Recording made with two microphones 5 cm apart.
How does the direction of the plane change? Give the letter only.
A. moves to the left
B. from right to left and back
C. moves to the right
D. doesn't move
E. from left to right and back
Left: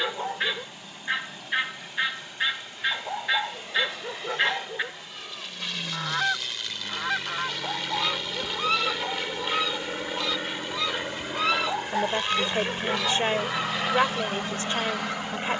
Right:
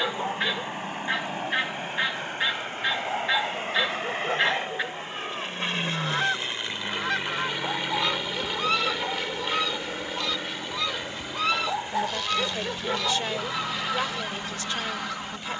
A.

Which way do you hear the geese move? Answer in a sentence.
In this clip you hear the geese stay in one place.